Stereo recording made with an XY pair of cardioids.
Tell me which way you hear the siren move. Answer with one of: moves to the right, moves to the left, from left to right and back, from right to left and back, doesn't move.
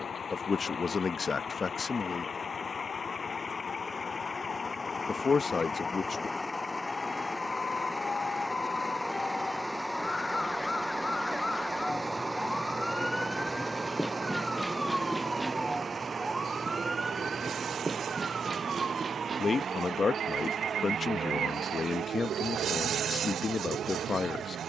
moves to the right.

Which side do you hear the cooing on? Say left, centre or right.
right.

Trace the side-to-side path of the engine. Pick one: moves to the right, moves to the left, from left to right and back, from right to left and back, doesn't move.
moves to the right.